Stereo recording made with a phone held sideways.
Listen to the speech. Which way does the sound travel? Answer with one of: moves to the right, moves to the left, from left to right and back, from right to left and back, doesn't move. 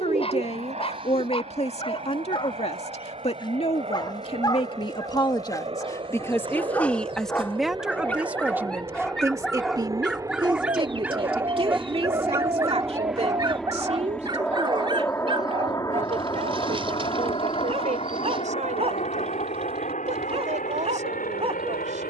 moves to the right.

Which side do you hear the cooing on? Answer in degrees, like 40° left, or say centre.
40° right.